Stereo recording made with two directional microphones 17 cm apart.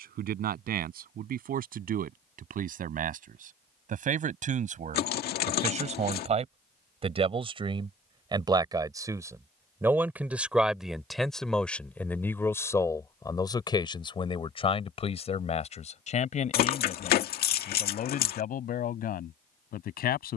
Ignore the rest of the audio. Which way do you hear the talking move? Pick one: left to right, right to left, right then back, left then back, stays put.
right to left.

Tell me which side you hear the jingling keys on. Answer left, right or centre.
left.